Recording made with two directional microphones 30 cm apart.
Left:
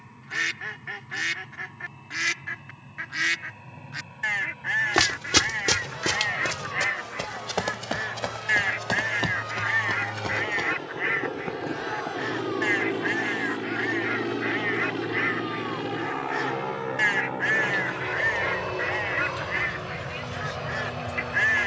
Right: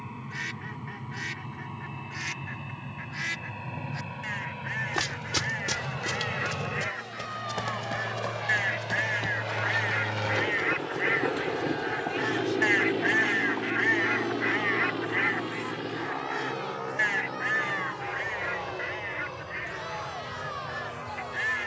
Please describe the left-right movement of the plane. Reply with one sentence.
You can hear the plane move to the left.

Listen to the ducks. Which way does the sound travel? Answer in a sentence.
In this clip you hear the ducks go right and come back.